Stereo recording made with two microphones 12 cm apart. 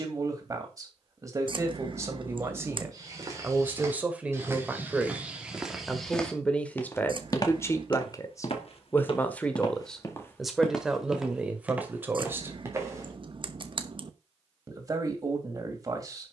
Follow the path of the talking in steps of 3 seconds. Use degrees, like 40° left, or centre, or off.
30° right, 10° right, 20° left, centre, 20° right, 30° right.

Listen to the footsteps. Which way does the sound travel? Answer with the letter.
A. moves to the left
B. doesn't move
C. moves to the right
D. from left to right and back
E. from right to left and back
E.